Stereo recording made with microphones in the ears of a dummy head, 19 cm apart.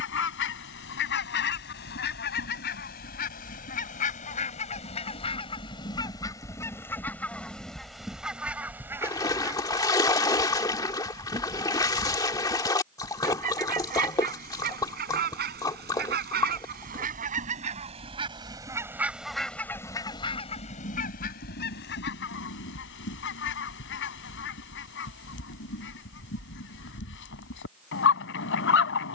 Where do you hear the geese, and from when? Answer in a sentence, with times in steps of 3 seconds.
You can hear the geese on the left from 0 s, in the centre from 6 s, on the right from 9 s, in the centre from 18 s and on the left from 21 s.